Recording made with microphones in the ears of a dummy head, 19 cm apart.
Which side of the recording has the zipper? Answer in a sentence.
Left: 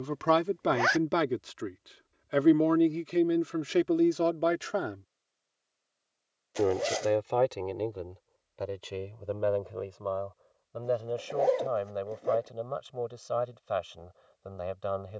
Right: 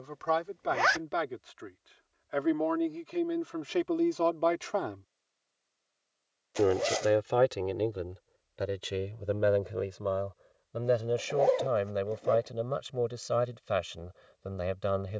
In this clip you hear the zipper in the centre.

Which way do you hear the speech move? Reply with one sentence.
In this clip you hear the speech go from the left side to the right.